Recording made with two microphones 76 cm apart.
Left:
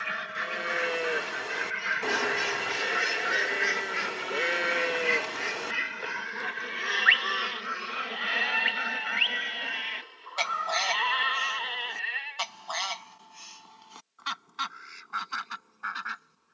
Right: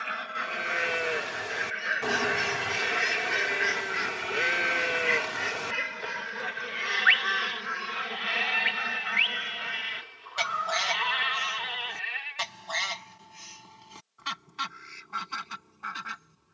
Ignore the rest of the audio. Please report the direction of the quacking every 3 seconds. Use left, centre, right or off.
left, centre, right, right, right, right.